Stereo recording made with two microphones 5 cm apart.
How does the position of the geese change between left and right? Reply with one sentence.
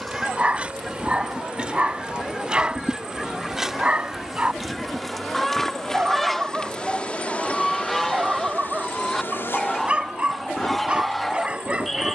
In this clip you hear the geese stay in one place.